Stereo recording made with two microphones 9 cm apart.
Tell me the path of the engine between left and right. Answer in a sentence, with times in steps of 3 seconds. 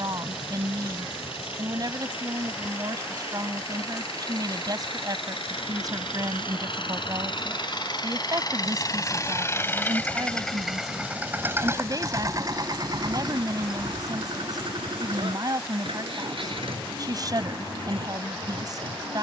You can hear the engine on the left from 0 s, in the centre from 9 s and on the right from 12 s.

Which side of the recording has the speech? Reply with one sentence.
You can hear the speech on the right.